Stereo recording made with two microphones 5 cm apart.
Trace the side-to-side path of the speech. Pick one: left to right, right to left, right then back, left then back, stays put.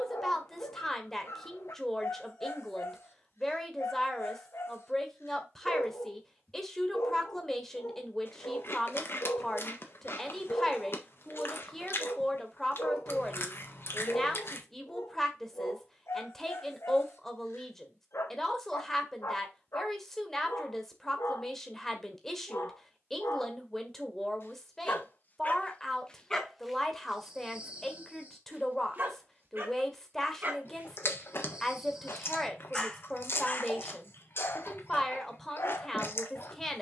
stays put.